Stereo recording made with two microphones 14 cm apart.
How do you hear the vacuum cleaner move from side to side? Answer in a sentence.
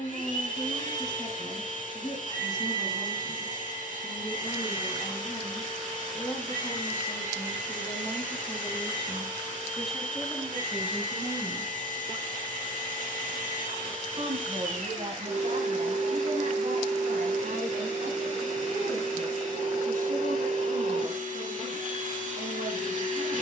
You can hear the vacuum cleaner stay in one place.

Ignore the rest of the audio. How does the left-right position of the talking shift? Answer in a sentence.
In this clip you hear the talking move from left to right.